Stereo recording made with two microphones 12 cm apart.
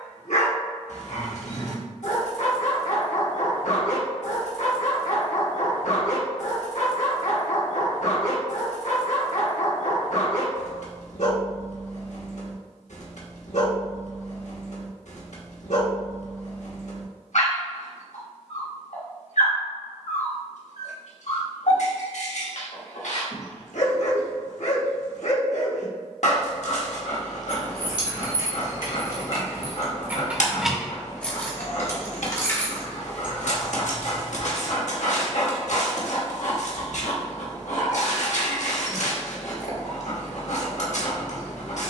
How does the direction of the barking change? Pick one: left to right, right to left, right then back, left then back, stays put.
stays put.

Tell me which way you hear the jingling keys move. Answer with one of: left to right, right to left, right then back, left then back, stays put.
left then back.